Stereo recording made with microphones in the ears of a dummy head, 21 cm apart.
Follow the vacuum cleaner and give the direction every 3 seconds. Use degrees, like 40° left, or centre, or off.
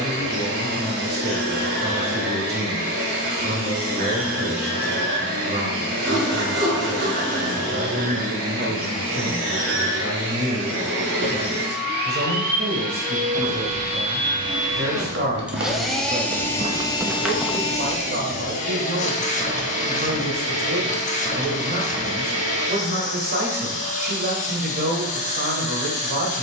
60° right, 60° right, 60° right, 50° right, 30° right, 10° left, 30° left, 30° left, 30° left.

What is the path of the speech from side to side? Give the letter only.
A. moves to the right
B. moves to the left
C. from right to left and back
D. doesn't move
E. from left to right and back
D.